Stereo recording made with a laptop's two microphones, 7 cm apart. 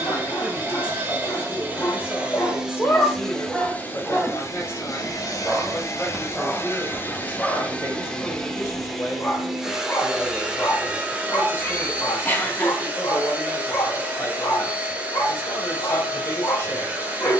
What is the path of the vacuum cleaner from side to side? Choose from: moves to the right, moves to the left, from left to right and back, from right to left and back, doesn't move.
from right to left and back.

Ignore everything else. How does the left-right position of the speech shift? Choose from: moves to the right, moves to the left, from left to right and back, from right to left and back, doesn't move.
doesn't move.